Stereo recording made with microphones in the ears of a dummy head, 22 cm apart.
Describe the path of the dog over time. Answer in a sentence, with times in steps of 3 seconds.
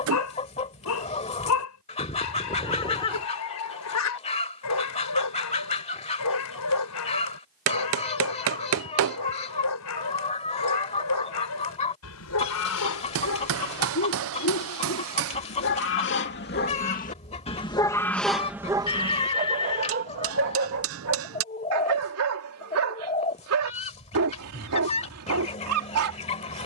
You can hear the dog on the left from 0 s and on the right from 18 s.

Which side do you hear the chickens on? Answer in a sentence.
In this clip you hear the chickens on the left.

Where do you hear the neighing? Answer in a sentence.
You can hear the neighing on the left.